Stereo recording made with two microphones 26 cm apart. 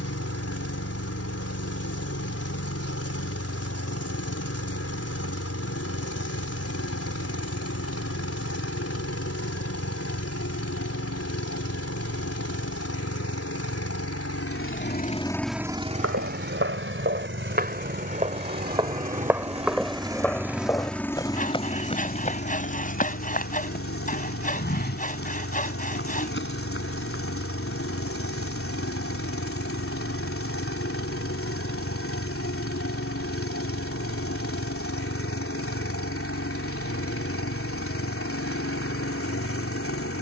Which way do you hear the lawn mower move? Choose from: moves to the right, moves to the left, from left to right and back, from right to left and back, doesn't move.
from left to right and back.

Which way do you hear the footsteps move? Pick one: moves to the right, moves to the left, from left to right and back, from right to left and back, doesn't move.
moves to the left.